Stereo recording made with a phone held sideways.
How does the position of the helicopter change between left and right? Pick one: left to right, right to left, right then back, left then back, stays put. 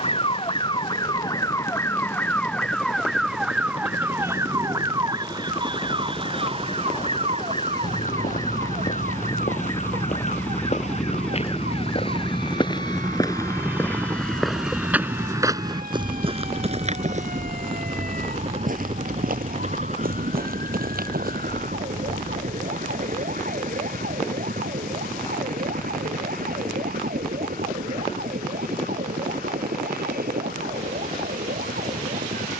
left to right.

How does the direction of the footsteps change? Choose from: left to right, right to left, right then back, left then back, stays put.
left to right.